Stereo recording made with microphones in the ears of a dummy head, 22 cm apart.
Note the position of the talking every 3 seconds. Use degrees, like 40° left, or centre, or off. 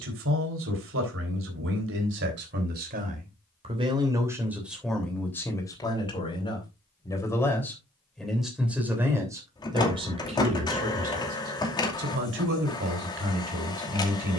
50° right, 10° right, 10° left, 20° right, 50° right.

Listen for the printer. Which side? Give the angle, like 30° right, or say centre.
20° left.